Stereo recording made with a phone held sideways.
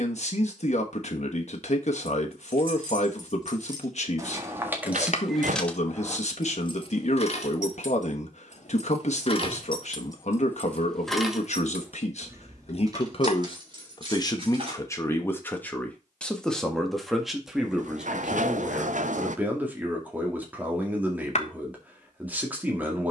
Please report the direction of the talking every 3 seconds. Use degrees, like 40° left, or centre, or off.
60° left, 60° left, 60° left, 60° left, 40° left, centre, 10° right, 10° right.